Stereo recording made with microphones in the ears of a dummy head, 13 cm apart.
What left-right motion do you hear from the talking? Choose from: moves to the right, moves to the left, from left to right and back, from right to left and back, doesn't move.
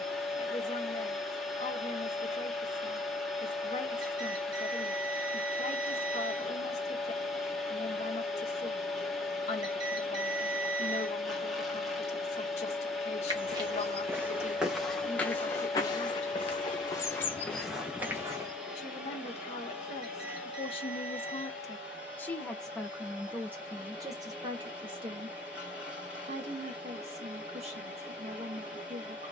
moves to the right.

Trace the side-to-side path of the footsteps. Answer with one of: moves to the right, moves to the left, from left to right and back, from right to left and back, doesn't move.
from right to left and back.